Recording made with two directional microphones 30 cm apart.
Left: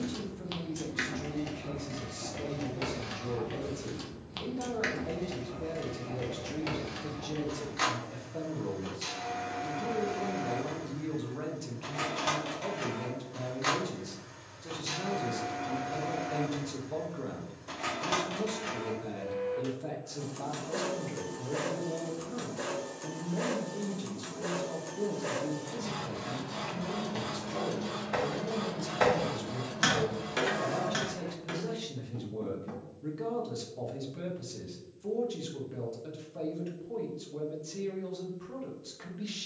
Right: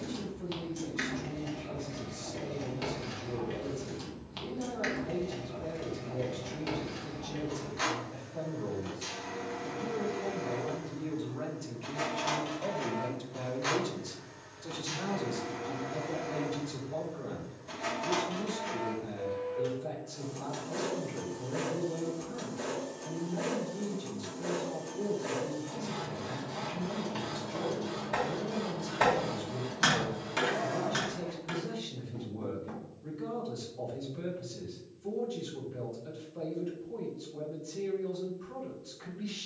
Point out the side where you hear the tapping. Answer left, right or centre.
centre.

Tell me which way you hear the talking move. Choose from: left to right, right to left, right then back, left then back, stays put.
right then back.